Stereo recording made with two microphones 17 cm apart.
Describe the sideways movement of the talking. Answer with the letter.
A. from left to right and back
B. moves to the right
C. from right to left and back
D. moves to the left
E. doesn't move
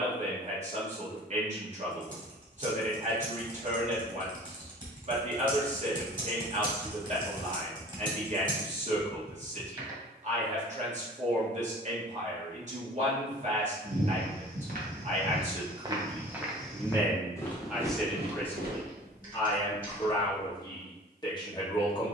D.